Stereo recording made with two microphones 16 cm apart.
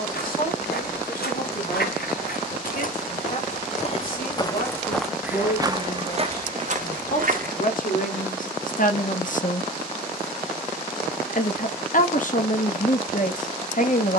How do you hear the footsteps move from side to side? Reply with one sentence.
In this clip you hear the footsteps go from the left side to the right.